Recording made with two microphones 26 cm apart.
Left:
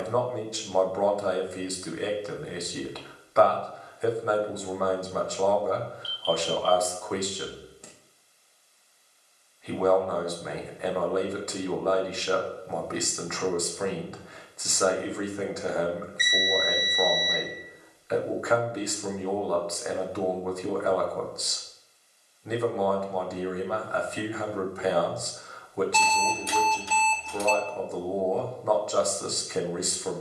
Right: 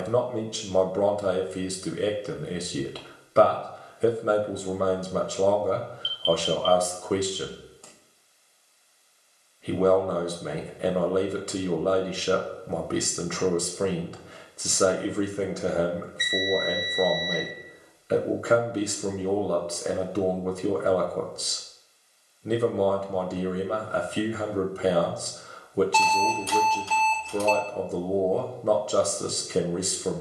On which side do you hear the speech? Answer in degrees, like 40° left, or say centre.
30° right.